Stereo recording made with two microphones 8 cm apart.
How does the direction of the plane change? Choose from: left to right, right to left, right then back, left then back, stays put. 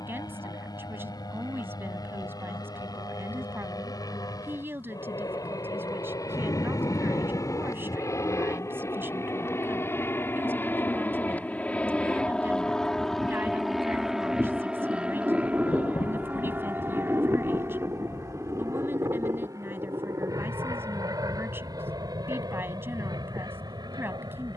left to right.